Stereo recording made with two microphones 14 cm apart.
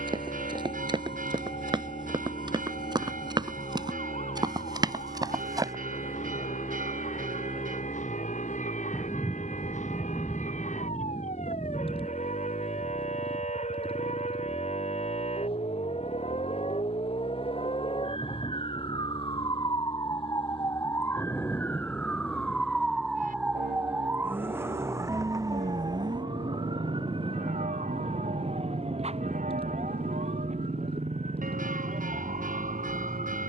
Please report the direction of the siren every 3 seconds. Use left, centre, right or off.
left, left, left, left, left, left, left, centre, right, right, right.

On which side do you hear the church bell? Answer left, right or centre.
right.